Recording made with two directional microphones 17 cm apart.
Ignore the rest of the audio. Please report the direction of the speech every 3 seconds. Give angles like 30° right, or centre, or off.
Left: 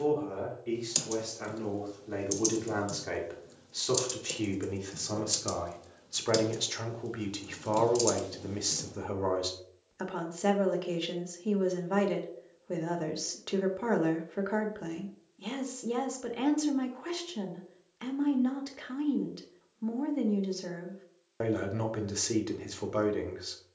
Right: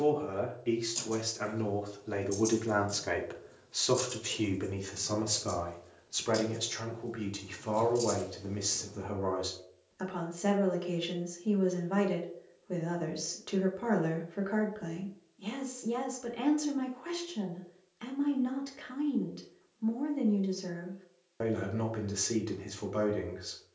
30° right, 10° right, 20° left, 20° left, 20° left, 20° left, 20° left, 20° left.